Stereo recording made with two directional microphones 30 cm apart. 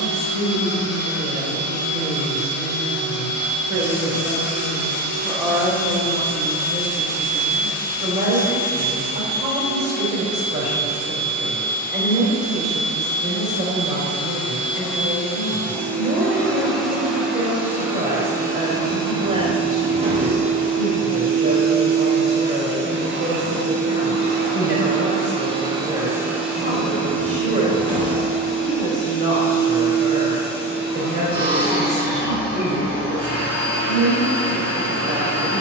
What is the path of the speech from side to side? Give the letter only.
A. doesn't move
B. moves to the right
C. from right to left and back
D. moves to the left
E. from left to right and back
B.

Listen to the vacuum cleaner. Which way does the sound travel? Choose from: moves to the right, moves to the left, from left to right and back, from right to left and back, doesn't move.
from left to right and back.